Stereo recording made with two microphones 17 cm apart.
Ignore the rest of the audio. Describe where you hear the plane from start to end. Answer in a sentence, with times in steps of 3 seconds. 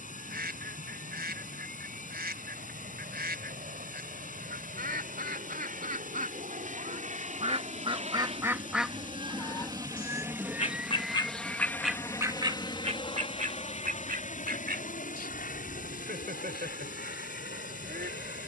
In this clip you hear the plane on the right from 0 s, in the centre from 9 s and on the left from 12 s.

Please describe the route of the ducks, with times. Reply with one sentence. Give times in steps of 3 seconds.
In this clip you hear the ducks on the right from 0 s, on the left from 9 s and on the right from 12 s.